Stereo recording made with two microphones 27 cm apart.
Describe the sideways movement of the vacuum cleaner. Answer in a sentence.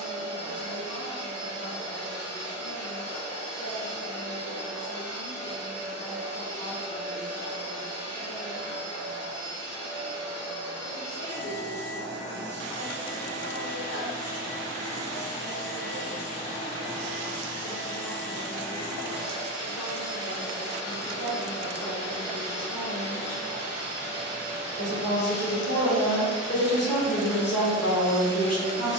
In this clip you hear the vacuum cleaner stay put.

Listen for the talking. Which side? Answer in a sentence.
In this clip you hear the talking on the left.